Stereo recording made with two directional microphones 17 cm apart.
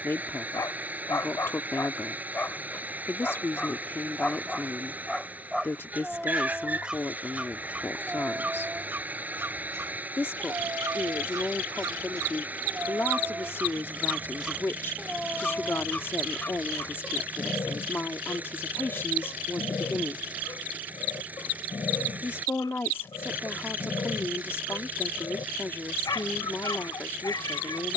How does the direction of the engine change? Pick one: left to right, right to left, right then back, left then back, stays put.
stays put.